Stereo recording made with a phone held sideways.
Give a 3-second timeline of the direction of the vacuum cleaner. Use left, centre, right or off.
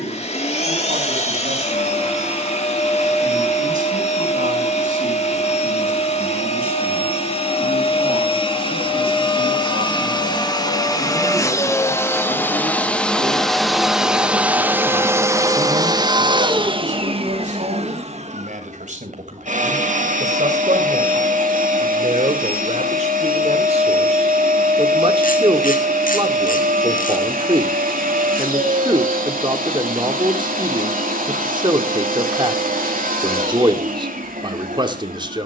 left, left, left, left, centre, right, right, right, right, right, right, right.